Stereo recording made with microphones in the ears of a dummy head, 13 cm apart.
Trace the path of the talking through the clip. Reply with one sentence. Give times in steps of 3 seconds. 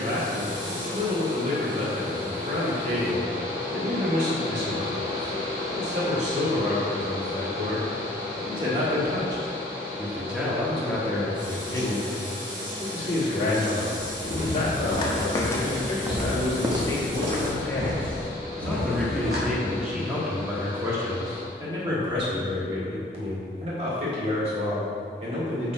You can hear the talking on the right from 0 s, in the centre from 9 s, on the left from 12 s, in the centre from 18 s and on the right from 21 s.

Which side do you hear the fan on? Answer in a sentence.
You can hear the fan on the right.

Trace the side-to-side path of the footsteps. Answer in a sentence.
In this clip you hear the footsteps move to the right.